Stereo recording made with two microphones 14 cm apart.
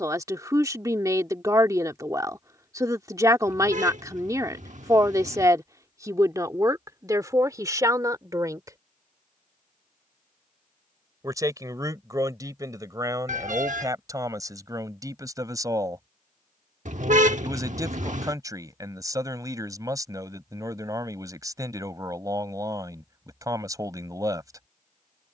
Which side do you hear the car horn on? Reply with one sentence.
You can hear the car horn on the right.